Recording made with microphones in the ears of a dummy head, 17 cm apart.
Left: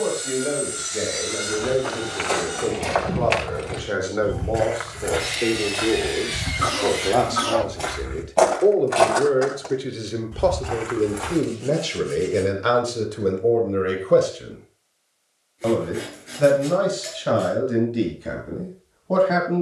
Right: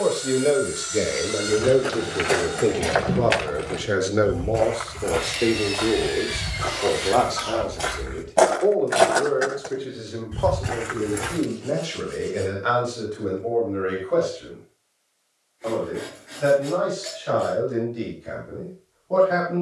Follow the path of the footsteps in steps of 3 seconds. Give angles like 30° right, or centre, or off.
20° right, 10° left, centre, 20° right, off, off, off.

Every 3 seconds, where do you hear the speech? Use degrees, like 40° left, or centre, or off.
40° right, 20° right, 10° left, 40° left, 50° left, 60° left, 70° left.